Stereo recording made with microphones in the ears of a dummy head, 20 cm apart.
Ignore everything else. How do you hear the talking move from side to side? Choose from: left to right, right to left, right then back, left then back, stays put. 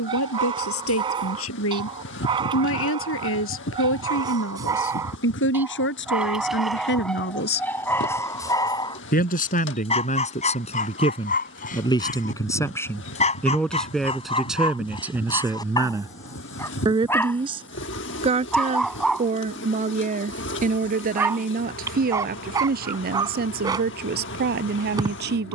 left to right.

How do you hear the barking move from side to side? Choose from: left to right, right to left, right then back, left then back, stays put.
left then back.